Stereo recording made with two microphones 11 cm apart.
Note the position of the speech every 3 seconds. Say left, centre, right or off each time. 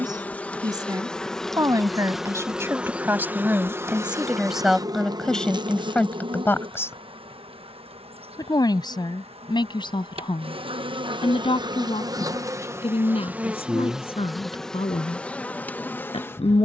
right, centre, left, left, left, left.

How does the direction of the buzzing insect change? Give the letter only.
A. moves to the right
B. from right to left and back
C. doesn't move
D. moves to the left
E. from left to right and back
E.